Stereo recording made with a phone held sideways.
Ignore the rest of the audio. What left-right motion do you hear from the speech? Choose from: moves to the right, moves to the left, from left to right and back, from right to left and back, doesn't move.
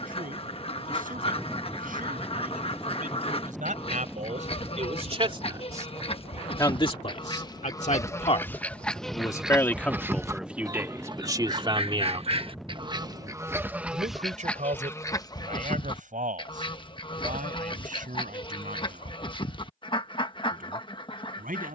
from right to left and back.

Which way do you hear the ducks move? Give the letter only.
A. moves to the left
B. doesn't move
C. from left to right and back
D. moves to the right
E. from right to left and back
C.